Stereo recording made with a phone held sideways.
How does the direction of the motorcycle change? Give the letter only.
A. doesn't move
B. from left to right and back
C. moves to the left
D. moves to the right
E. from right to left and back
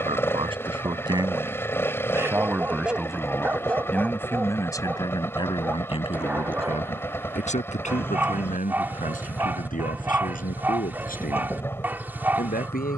A.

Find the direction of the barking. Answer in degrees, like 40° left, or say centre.
10° right.